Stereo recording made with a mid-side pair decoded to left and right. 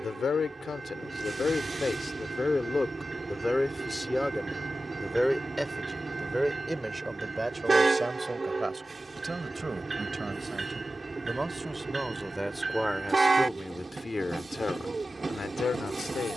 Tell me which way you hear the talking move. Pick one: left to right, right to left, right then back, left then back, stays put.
right then back.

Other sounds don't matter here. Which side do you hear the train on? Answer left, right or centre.
right.